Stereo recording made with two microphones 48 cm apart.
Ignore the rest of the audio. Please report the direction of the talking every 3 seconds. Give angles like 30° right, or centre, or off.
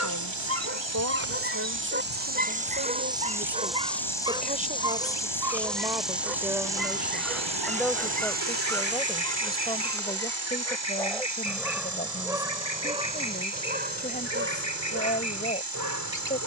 30° right, 20° right, centre, 10° left, 20° left, 20° left.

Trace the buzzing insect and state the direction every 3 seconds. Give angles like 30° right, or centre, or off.
30° right, centre, 10° right, 30° right, 40° right, 50° right.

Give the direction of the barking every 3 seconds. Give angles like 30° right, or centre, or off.
20° right, 10° right, centre, centre, 20° right, 40° right.